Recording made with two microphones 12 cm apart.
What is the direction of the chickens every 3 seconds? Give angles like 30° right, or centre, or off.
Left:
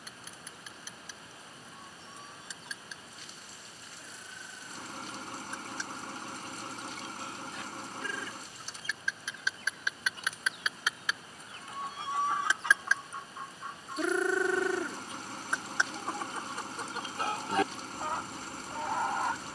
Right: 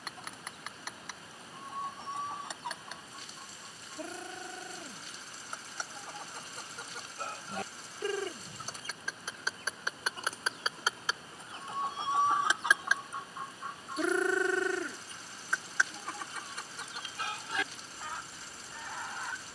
60° right, 60° right, 50° right, 40° right, 10° right, 30° left, 50° left.